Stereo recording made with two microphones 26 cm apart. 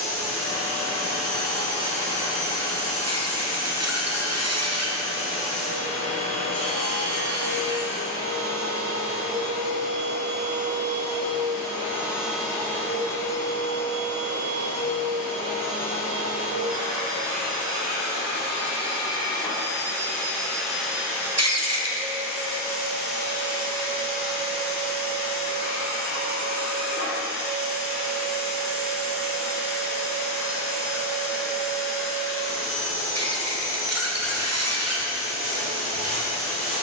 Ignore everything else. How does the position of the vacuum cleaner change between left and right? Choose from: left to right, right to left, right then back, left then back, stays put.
left then back.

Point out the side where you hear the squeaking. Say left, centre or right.
right.